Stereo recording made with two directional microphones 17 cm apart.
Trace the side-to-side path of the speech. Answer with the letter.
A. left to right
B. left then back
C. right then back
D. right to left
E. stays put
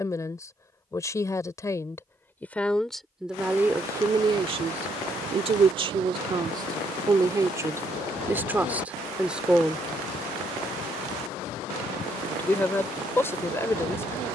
C.